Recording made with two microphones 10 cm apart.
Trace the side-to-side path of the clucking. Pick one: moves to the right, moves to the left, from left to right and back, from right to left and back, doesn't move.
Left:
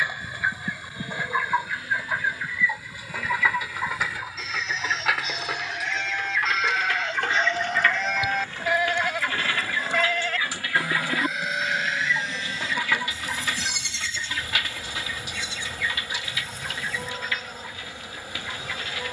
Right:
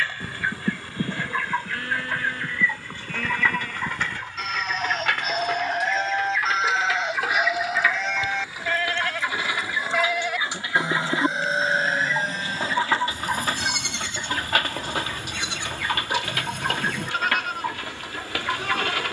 moves to the right.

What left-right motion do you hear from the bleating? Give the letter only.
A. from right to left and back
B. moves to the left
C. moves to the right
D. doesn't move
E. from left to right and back
A.